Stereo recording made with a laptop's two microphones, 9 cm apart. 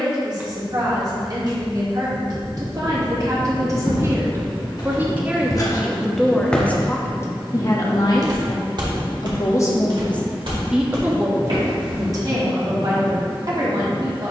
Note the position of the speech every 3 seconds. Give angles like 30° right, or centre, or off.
50° right, 30° right, 30° left, centre, 50° right.